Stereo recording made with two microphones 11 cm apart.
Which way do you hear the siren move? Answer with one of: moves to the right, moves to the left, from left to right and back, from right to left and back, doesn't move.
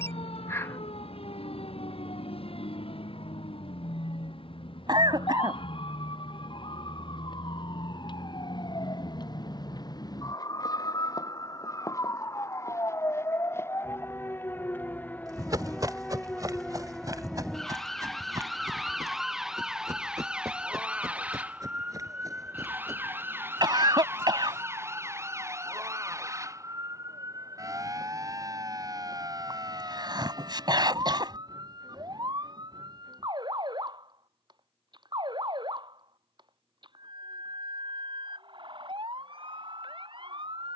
moves to the right.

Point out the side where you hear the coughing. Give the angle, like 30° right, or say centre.
40° right.